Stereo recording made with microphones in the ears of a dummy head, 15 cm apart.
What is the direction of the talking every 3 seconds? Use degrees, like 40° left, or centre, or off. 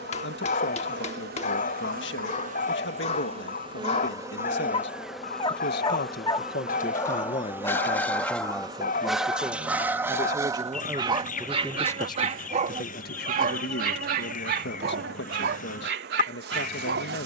80° left, 80° left, 30° left, 10° right, 60° left, 70° left.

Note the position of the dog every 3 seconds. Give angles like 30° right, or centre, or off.
50° left, 40° left, 10° left, 20° right, 50° right, 70° right.